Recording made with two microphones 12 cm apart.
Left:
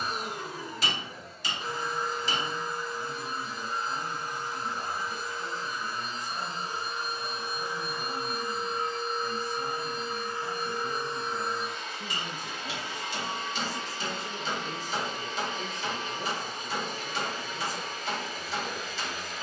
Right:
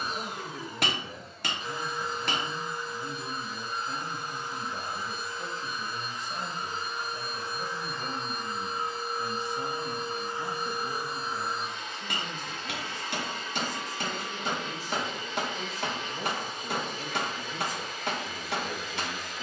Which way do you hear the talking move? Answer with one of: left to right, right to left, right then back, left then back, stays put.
left then back.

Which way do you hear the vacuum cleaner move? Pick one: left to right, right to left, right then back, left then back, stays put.
right then back.